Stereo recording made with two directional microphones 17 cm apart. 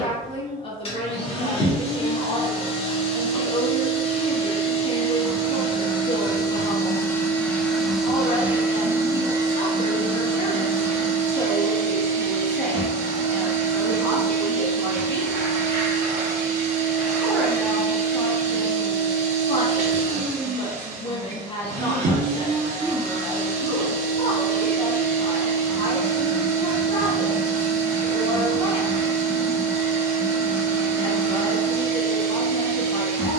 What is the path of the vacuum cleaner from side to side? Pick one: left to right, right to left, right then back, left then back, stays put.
left to right.